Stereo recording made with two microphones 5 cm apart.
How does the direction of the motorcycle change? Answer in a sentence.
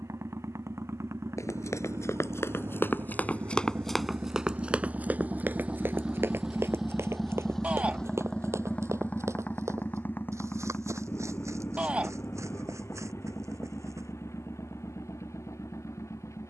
You can hear the motorcycle move from right to left.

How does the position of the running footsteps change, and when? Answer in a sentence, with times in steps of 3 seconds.
You can hear the running footsteps on the left from 0 s, in the centre from 3 s, on the right from 6 s and not at all from 15 s.